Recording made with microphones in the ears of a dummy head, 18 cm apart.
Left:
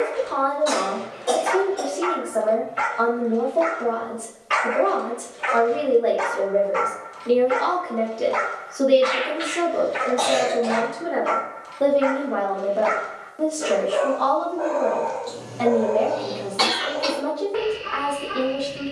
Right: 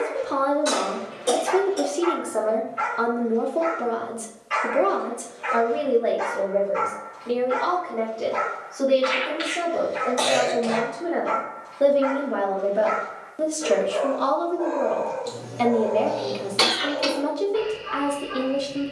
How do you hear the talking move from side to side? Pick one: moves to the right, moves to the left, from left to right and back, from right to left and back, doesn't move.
from right to left and back.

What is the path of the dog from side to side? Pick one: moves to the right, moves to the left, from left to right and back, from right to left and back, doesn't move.
doesn't move.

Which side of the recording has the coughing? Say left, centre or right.
right.